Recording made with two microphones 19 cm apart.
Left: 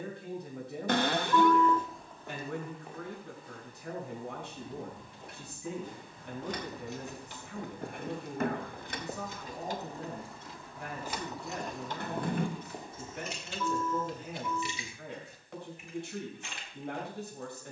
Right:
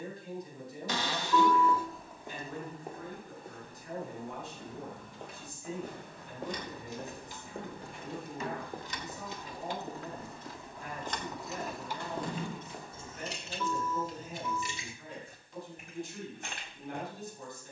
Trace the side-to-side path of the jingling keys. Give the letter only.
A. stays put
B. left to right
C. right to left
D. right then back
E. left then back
B.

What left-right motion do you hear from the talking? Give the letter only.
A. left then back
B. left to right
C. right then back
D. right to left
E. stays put
E.